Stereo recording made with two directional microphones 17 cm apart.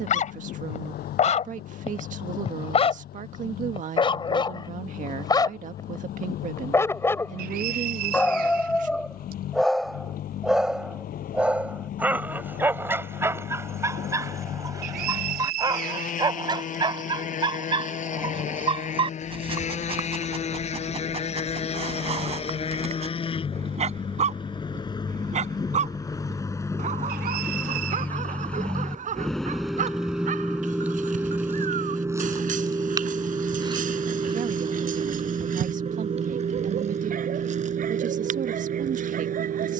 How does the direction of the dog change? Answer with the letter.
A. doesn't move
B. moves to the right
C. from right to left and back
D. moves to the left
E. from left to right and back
B.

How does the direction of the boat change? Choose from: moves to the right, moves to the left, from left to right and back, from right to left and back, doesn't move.
moves to the right.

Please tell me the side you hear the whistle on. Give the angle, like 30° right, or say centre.
60° right.